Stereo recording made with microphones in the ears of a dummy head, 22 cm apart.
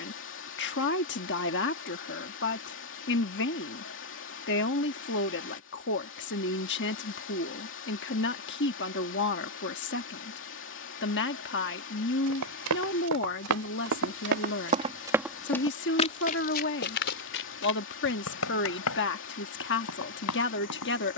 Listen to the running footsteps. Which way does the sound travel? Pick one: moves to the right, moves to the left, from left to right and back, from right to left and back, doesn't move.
moves to the left.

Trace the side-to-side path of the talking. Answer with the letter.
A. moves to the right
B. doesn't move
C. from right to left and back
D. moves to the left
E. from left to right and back
B.